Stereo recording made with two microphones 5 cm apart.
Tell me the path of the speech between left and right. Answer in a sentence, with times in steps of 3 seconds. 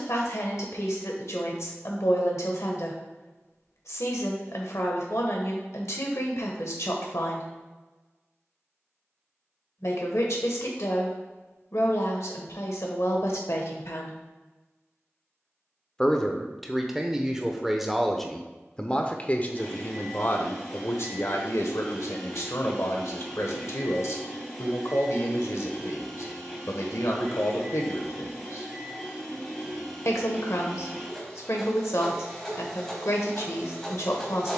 In this clip you hear the speech on the left from 0 s, in the centre from 15 s and on the left from 18 s.